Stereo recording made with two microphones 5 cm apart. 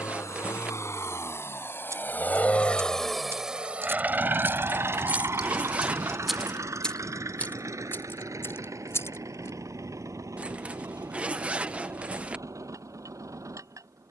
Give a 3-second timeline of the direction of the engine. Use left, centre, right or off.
left, right, right, right, right.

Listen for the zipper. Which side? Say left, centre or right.
right.